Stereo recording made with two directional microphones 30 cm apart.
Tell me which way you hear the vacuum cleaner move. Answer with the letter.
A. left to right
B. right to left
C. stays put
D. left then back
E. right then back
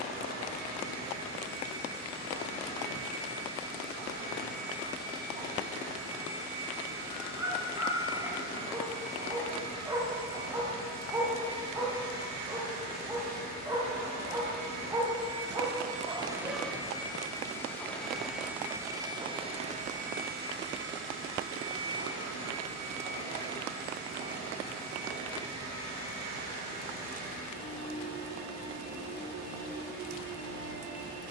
D.